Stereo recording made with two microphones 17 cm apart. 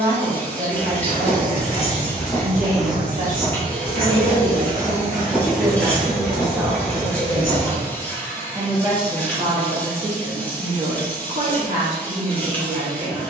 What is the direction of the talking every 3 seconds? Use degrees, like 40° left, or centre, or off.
60° right, 30° right, centre, 40° right, 60° right.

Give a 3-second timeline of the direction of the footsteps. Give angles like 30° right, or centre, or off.
30° left, 20° right, 40° left, off, off.